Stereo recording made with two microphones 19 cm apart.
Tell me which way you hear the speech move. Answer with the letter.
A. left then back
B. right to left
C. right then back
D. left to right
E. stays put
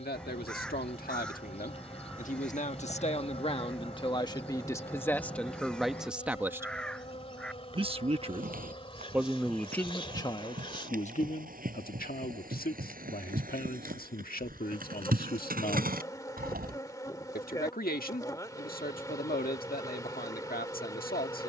C.